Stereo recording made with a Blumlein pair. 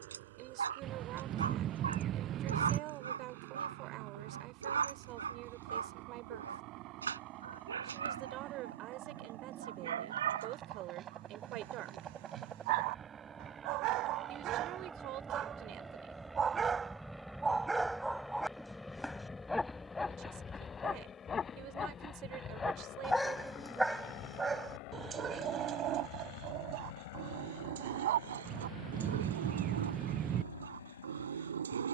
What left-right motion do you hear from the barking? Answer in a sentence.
In this clip you hear the barking go left and come back.